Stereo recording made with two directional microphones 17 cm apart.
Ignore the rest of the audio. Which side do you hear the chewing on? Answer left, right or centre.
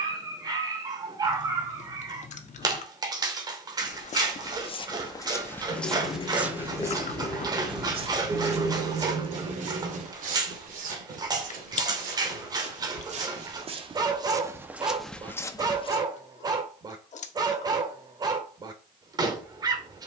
left.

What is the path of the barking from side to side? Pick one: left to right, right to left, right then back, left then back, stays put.
stays put.